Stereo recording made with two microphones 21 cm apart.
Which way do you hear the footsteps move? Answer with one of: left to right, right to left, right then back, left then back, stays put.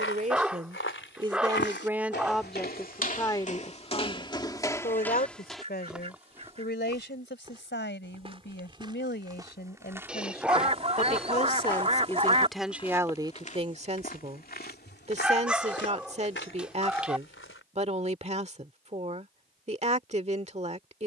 right then back.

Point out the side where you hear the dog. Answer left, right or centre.
centre.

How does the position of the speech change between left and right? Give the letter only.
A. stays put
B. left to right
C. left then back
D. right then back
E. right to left
C.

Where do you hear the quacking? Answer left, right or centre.
right.